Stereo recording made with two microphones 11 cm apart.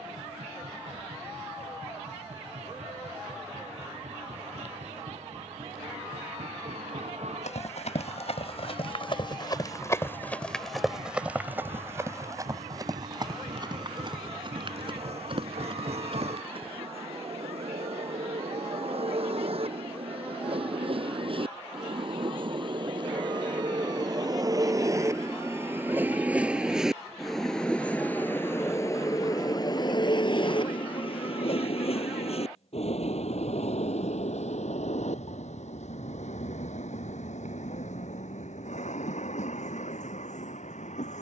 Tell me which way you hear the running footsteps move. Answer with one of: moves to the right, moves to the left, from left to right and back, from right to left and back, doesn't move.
moves to the right.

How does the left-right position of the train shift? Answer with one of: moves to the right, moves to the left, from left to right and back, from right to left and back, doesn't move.
moves to the left.